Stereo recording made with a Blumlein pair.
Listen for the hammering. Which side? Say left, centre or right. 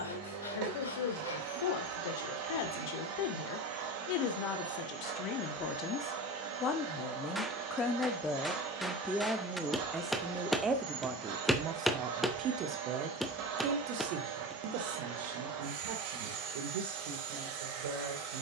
centre.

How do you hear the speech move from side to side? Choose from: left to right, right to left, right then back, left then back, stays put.
left to right.